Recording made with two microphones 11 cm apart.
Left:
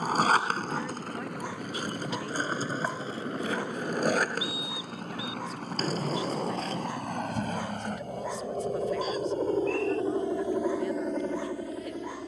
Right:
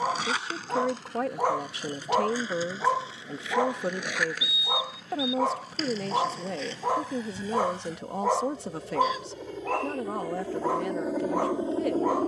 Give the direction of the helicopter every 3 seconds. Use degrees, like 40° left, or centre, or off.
70° left, 70° left, 60° left, 10° left.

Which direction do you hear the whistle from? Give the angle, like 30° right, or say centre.
40° left.